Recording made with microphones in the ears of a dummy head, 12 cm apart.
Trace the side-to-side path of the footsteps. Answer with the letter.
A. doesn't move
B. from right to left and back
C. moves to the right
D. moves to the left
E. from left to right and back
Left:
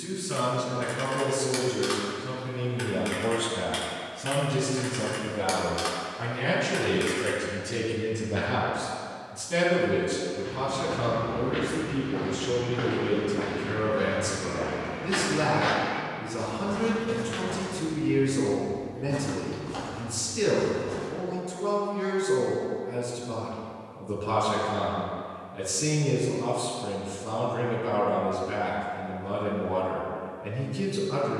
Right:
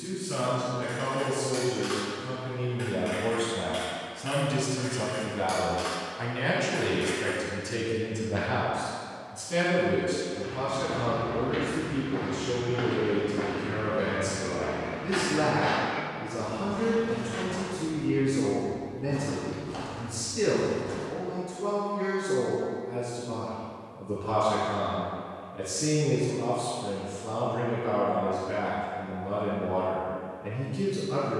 B.